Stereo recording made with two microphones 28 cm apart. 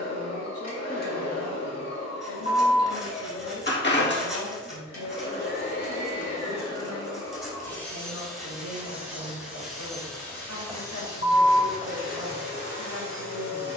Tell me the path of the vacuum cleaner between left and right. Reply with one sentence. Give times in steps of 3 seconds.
You can hear the vacuum cleaner on the left from 0 s, in the centre from 6 s and on the left from 12 s.